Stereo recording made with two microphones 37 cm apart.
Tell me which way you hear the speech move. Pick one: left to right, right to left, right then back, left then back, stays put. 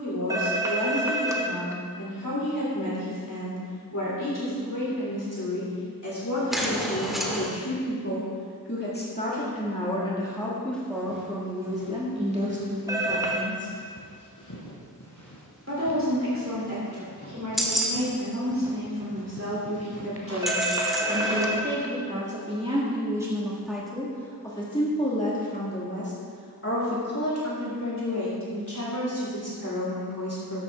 right then back.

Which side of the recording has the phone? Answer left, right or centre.
centre.